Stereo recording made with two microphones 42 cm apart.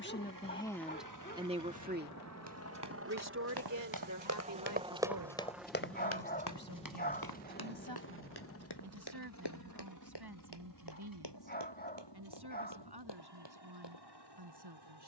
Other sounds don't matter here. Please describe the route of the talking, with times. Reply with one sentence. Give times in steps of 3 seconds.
You can hear the talking in the centre from 0 s and on the right from 3 s.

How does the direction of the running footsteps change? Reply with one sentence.
You can hear the running footsteps travel towards the left.